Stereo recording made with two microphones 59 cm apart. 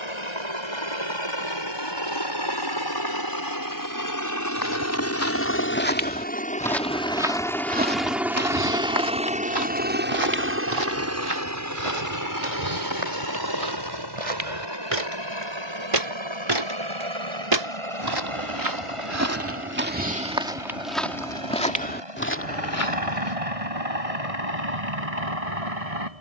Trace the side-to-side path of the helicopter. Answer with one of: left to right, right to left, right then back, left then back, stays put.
left to right.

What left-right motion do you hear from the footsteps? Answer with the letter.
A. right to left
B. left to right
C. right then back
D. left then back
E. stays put
C.